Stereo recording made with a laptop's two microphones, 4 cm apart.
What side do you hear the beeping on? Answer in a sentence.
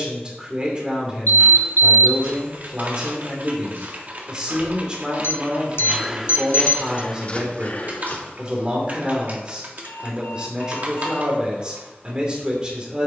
You can hear the beeping on the left.